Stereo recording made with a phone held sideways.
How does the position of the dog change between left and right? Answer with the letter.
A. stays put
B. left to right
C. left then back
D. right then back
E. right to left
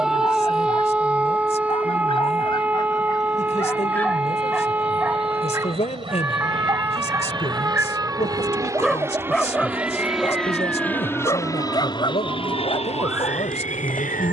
D.